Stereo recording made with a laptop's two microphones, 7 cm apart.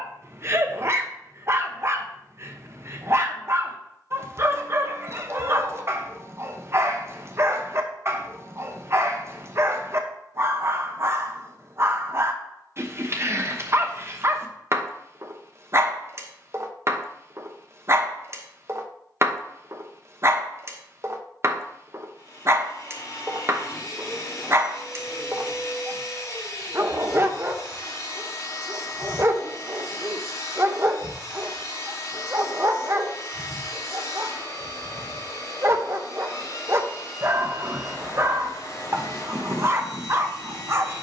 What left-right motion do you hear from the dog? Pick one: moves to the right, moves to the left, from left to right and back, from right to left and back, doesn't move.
doesn't move.